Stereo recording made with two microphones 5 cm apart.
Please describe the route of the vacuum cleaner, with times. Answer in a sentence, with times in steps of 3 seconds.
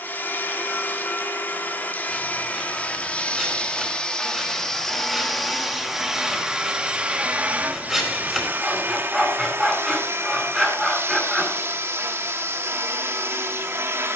In this clip you hear the vacuum cleaner on the left from 0 s, in the centre from 3 s and on the right from 6 s.